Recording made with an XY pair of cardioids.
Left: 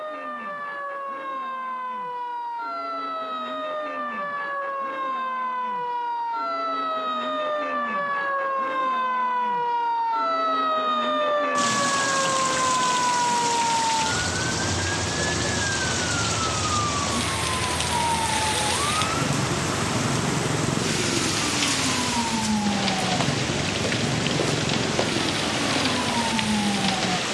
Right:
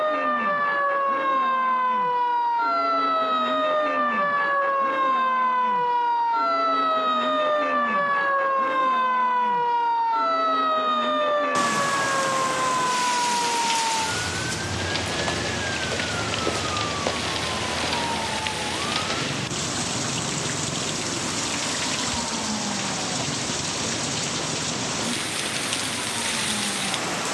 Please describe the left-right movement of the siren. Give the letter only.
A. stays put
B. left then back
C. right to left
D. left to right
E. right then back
C.